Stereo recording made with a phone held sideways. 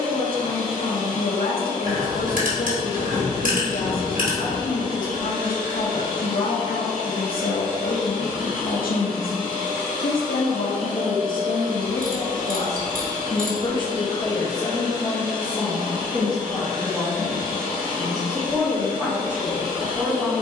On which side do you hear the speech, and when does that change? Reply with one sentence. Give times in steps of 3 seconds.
In this clip you hear the speech on the left from 0 s and in the centre from 15 s.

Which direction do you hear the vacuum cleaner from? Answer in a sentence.
In this clip you hear the vacuum cleaner on the right.